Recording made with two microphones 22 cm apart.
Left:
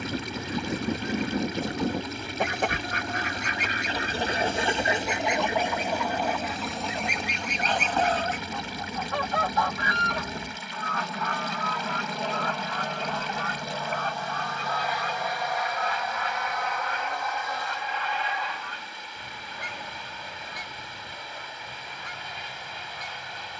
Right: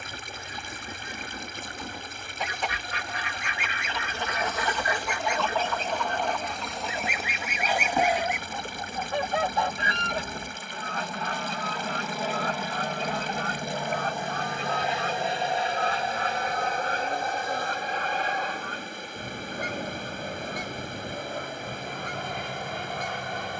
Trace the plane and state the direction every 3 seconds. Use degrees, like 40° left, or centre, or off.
50° left, 40° left, 30° left, 10° left, 10° right, 30° right, 50° right, 50° right.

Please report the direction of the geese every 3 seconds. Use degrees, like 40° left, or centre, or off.
60° left, 30° left, centre, 30° right, 40° right, 50° right, 50° right, 50° right.